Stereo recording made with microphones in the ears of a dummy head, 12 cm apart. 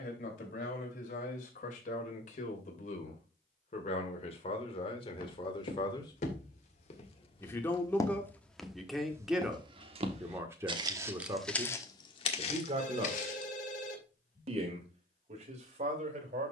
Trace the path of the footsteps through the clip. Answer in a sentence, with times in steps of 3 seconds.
In this clip you hear the footsteps not at all from 0 s, on the left from 3 s, on the right from 9 s, on the left from 12 s and not at all from 15 s.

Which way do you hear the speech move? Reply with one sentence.
You can hear the speech go from the left side to the right.